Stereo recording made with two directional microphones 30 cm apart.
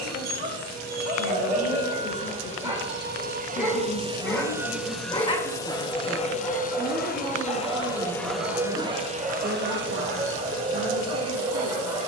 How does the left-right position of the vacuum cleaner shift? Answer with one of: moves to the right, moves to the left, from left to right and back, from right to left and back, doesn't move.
from right to left and back.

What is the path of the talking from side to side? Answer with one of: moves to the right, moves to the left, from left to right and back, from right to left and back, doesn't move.
moves to the right.